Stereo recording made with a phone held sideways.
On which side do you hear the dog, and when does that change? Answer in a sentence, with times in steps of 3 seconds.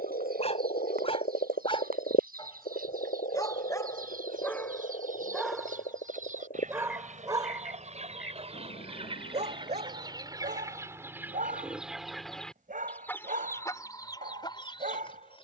You can hear the dog on the left from 0 s, in the centre from 3 s and on the right from 6 s.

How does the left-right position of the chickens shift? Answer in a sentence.
You can hear the chickens go from the right side to the left.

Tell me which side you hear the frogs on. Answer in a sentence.
In this clip you hear the frogs on the left.